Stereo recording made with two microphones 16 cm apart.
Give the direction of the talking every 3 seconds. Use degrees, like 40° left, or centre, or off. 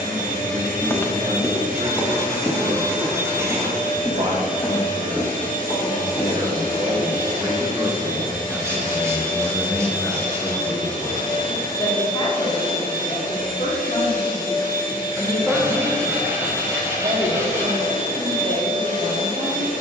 50° right, 50° right, 20° right, 20° left, 40° left, 20° right, 40° right.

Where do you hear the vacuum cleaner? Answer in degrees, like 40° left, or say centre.
70° right.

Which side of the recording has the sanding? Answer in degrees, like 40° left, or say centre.
20° right.